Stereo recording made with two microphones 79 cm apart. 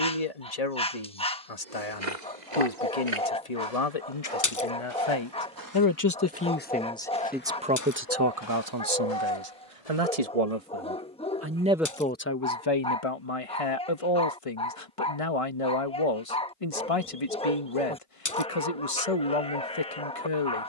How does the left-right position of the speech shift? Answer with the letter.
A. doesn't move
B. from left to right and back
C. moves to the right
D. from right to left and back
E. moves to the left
B.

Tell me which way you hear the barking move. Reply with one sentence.
In this clip you hear the barking stay put.